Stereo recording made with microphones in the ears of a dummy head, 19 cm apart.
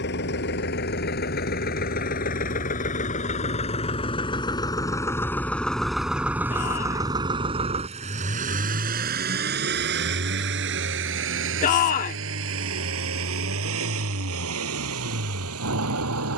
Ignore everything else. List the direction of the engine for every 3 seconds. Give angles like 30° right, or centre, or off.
50° left, 20° left, 20° right, 60° right, 70° right, 80° right.